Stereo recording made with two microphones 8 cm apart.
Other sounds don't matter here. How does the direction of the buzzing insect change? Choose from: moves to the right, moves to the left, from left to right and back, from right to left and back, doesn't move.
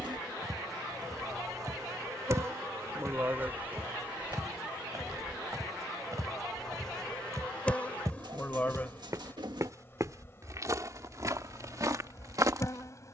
moves to the left.